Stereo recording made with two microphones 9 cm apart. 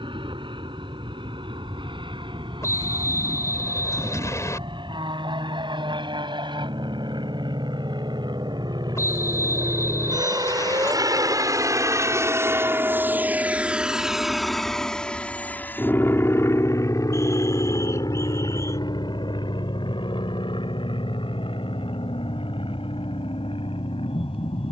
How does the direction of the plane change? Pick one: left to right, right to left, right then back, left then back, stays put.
right to left.